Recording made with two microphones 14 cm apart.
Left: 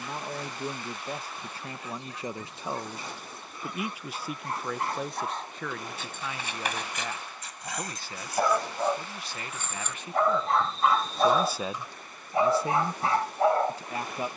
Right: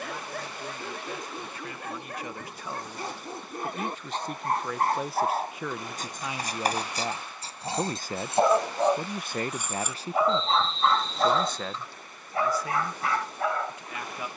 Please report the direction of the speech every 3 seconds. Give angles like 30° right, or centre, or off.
30° left, centre, 30° right, 20° right, 30° left.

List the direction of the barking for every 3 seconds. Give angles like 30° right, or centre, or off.
60° right, 50° right, 30° right, centre, 30° left.